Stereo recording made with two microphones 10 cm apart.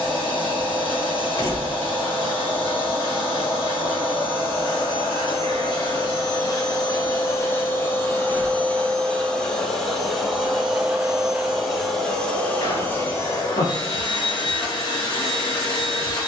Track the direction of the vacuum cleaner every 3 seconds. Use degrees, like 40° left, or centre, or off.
60° left, 50° left, 30° left, centre, 40° left, 50° left.